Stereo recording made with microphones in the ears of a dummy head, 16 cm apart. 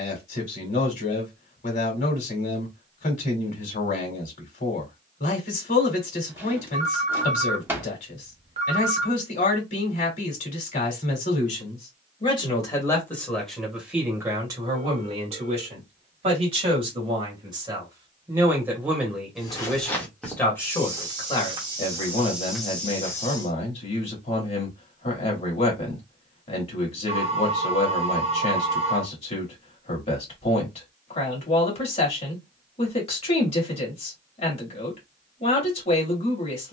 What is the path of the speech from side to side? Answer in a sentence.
In this clip you hear the speech go right and come back.